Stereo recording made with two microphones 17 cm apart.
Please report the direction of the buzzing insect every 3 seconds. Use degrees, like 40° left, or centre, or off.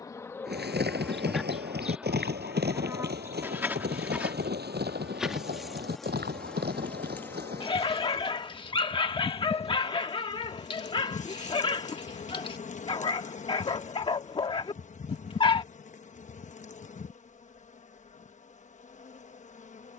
centre, 10° right, 10° left, 40° left, 40° left, 40° left, 40° left.